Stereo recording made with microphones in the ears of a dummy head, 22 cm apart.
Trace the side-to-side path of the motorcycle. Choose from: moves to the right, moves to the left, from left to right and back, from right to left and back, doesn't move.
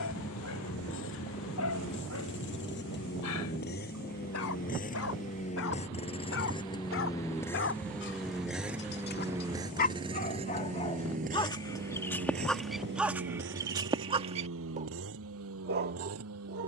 moves to the right.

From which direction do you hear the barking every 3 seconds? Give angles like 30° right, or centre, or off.
70° left, 60° left, 50° left, 30° left, 10° right, 40° right.